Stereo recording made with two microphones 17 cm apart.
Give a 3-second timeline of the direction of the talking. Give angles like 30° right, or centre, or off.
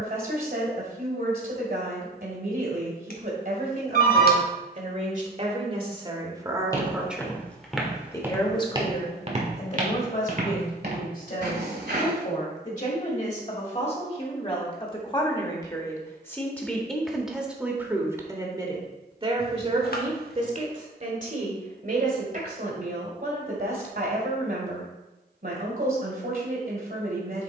60° right, 50° right, centre, 50° left, 40° left, 10° left, 30° right, 60° right, 60° right.